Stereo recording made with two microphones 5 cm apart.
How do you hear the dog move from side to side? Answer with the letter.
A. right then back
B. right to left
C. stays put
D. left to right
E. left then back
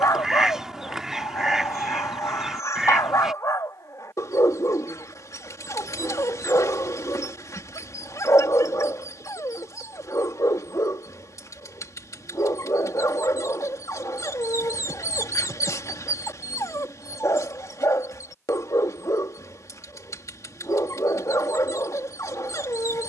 C.